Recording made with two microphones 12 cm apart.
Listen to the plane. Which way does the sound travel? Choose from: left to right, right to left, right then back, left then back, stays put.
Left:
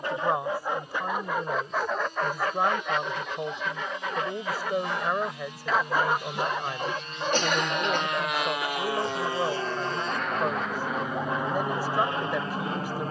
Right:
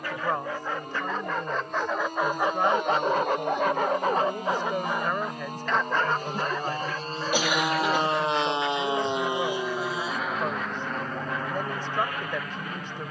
right to left.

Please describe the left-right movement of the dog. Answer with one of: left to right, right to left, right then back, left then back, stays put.
right then back.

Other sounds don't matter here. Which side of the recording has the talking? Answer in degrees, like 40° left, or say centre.
10° left.